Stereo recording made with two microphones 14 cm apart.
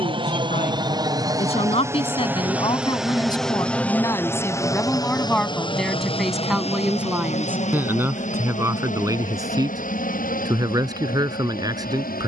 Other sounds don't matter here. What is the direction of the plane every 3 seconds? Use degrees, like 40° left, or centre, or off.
20° right, 20° left, 50° left, 60° left.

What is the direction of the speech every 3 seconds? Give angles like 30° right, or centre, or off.
50° left, 20° left, 10° right, 30° right.